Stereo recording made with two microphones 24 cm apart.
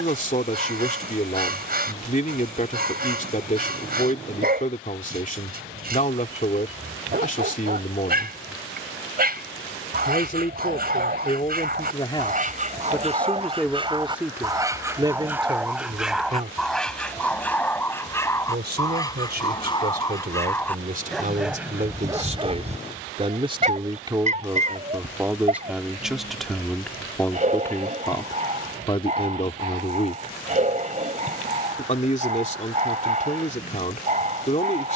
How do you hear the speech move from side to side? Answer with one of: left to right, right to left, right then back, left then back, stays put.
right then back.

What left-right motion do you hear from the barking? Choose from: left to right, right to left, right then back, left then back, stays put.
left then back.